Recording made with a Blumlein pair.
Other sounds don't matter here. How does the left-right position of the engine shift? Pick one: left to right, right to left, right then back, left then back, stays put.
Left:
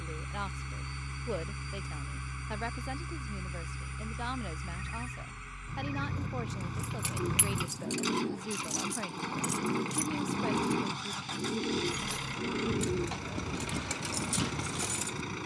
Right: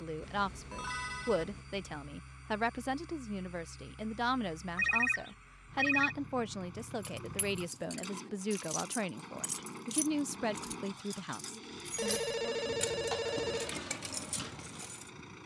stays put.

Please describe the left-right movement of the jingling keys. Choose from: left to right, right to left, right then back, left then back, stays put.
right then back.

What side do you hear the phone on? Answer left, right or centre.
right.